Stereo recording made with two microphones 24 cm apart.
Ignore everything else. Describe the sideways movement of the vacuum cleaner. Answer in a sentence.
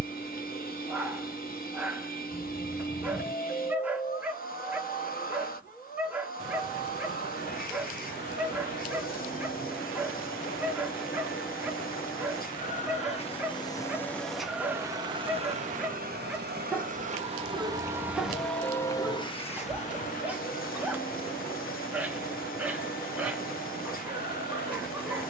You can hear the vacuum cleaner move from left to right and back again.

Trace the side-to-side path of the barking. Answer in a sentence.
You can hear the barking stay put.